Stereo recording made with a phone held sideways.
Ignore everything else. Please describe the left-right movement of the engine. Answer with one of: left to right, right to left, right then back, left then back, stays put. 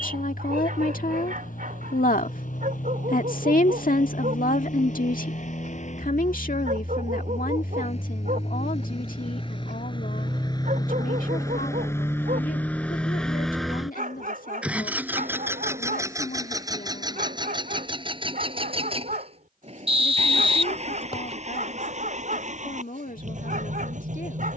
left to right.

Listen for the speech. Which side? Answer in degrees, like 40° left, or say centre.
70° left.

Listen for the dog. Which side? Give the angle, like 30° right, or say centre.
70° right.